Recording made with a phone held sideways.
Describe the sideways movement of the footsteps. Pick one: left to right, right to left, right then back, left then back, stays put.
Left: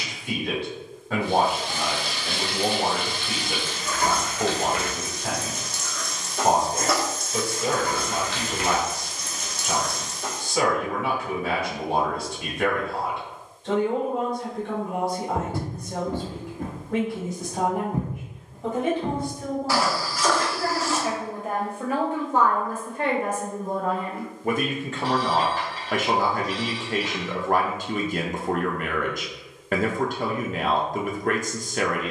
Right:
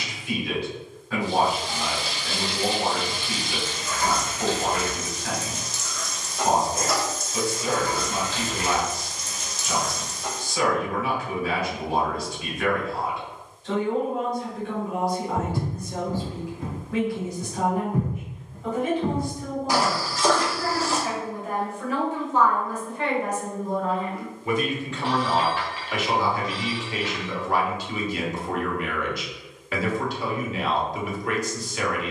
left to right.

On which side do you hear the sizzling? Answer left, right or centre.
left.